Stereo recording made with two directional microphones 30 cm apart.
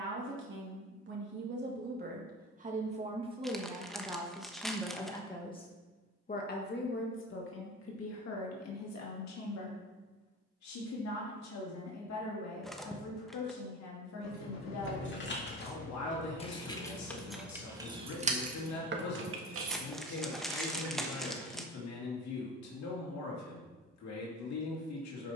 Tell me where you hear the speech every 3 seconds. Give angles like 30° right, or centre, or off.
30° right, centre, 40° left, 60° left, 60° left, 60° left, 60° left, 60° left, 60° left.